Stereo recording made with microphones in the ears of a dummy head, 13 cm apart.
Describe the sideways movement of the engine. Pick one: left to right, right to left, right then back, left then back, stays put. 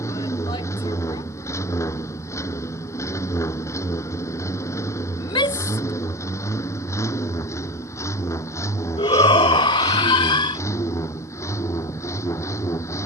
stays put.